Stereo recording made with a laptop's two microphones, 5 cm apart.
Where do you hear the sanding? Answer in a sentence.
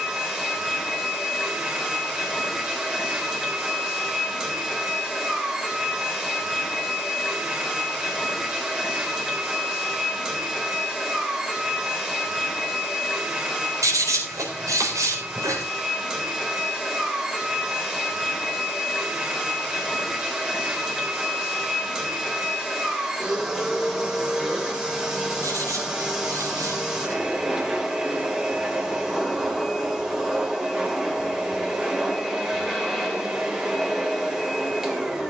You can hear the sanding on the right.